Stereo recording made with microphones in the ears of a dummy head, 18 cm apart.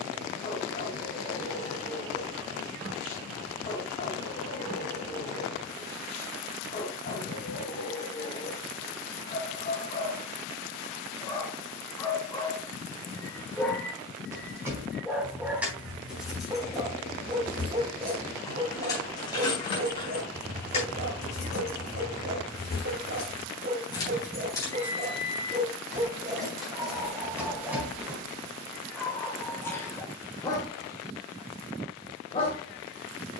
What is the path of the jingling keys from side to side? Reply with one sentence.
You can hear the jingling keys move from right to left and back again.